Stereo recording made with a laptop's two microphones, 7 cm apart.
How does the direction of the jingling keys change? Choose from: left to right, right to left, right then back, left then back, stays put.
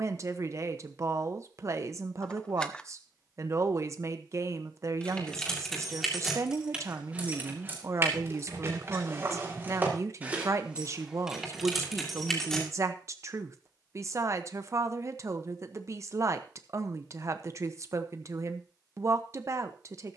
right then back.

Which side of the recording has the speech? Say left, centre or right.
right.